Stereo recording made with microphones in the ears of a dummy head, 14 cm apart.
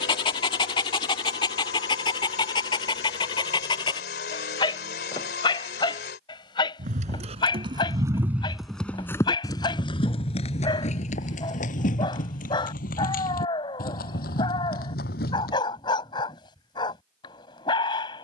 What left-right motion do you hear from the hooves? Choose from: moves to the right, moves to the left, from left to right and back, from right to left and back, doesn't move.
moves to the left.